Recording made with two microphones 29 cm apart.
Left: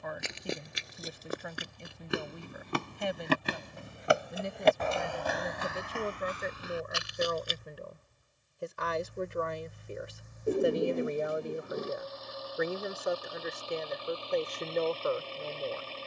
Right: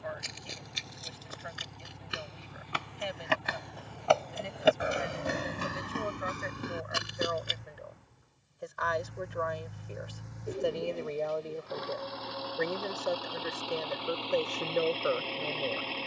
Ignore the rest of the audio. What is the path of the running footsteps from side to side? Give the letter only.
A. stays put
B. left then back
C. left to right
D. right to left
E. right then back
C.